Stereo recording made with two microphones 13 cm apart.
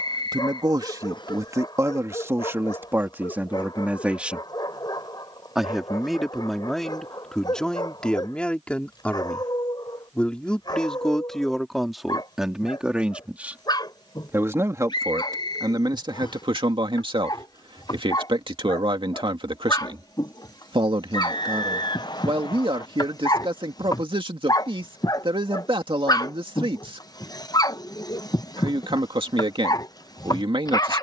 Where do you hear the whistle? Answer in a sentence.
In this clip you hear the whistle on the left.